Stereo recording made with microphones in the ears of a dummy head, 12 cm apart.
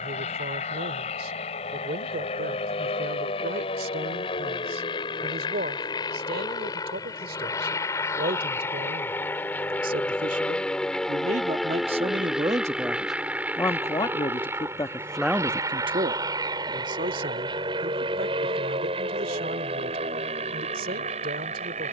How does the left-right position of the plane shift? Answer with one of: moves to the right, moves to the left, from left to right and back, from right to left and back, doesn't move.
moves to the right.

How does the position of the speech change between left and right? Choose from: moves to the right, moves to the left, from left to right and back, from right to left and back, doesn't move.
from right to left and back.